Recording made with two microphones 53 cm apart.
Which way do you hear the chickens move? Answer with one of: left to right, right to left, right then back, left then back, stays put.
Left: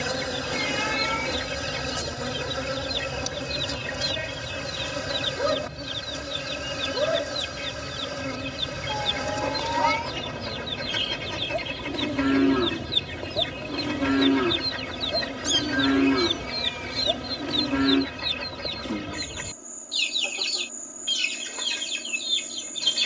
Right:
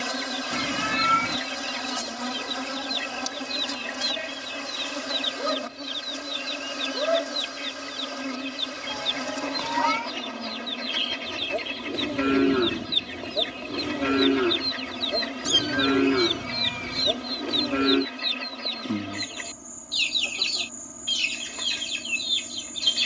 stays put.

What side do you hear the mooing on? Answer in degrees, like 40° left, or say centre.
20° left.